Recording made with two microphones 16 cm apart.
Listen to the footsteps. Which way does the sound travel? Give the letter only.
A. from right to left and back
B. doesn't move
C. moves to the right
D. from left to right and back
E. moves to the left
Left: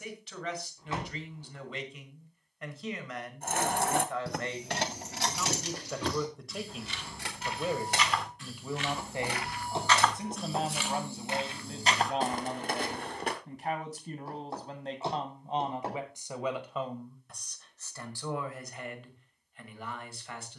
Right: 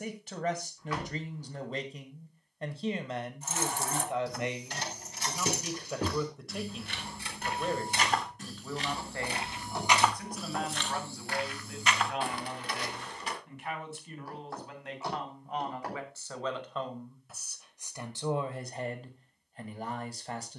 E.